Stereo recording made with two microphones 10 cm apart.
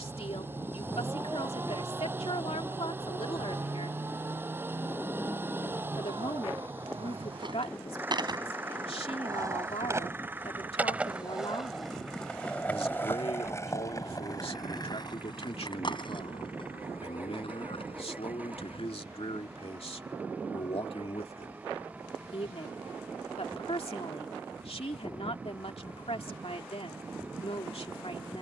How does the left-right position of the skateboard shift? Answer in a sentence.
You can hear the skateboard go from the right side to the left.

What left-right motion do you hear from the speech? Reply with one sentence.
In this clip you hear the speech stay in one place.